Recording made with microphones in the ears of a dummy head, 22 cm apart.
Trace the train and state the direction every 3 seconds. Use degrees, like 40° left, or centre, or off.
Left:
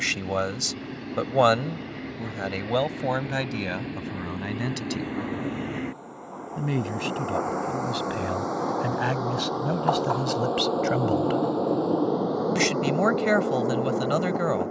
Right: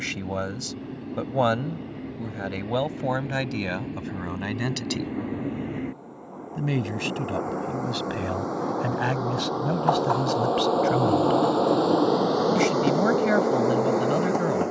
50° left, 40° left, 30° left, 20° right, 70° right.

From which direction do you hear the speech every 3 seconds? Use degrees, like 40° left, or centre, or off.
20° left, centre, centre, 10° left, 30° left.